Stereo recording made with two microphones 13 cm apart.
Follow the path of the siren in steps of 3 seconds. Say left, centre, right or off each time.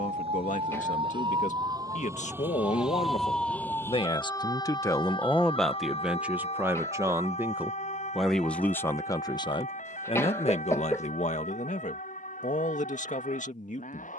right, left, left, left, left.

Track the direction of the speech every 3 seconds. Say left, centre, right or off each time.
left, left, centre, left, left.